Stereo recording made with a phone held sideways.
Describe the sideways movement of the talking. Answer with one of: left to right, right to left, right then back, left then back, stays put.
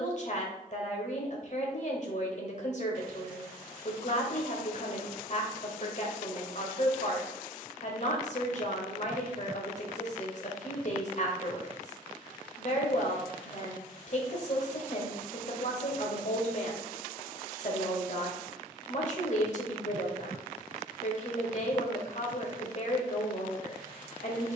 stays put.